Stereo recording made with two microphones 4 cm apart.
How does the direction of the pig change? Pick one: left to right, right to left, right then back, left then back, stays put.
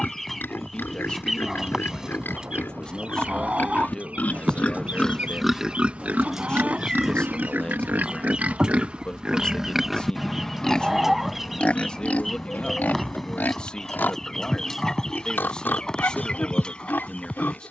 right then back.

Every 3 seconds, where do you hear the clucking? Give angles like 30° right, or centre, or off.
10° right, 40° right, 30° right, 10° right, centre, 20° left.